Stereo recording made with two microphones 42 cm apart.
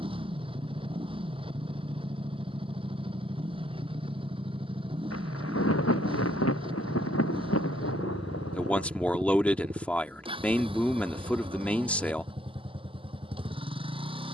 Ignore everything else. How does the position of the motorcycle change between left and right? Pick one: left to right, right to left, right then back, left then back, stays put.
stays put.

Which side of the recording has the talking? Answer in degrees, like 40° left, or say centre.
centre.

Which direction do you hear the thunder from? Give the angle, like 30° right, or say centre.
30° left.